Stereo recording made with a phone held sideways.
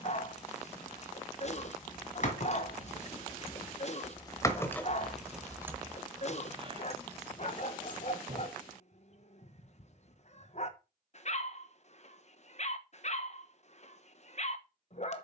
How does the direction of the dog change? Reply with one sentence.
In this clip you hear the dog stay in one place.